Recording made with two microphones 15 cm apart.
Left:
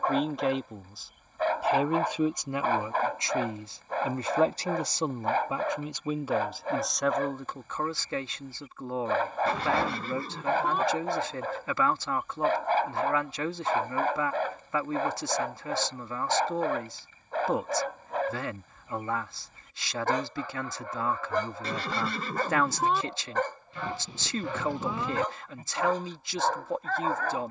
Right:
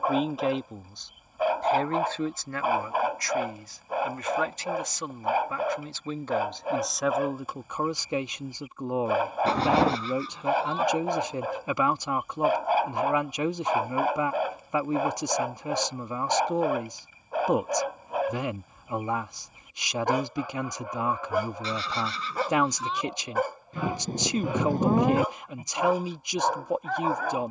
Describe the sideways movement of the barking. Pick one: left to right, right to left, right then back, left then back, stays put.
stays put.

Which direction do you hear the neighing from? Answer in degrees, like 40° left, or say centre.
50° left.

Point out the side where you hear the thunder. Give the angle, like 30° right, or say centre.
50° right.